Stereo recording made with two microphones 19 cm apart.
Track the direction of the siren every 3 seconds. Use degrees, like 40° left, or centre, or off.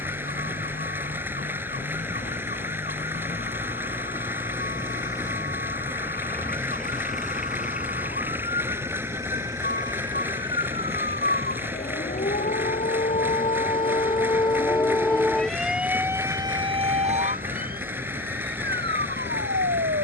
70° left, 70° left, 60° left, 60° left, 40° left, 20° right, 70° right.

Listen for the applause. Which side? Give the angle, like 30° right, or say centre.
10° right.